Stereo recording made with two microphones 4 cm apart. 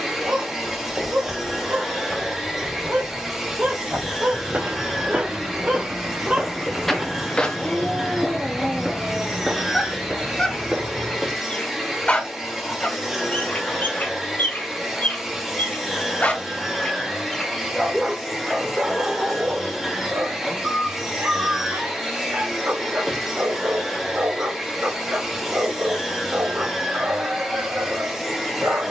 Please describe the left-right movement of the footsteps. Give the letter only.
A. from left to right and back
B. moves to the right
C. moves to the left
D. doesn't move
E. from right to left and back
E.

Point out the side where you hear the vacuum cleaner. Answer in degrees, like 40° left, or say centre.
10° right.